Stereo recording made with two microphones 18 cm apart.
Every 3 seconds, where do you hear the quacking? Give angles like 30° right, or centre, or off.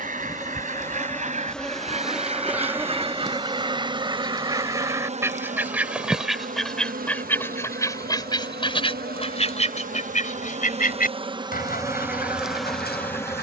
40° right, 20° right, 10° left, 40° left, 60° left.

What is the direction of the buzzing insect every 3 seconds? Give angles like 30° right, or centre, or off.
centre, 30° right, 50° right, 40° right, centre.